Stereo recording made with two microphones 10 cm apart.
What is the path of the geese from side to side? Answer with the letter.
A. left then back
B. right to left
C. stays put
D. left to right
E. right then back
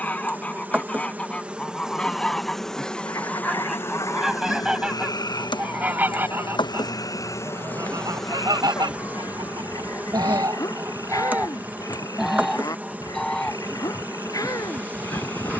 E.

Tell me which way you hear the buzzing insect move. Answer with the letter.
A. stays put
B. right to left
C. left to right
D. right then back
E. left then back
E.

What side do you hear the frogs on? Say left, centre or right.
left.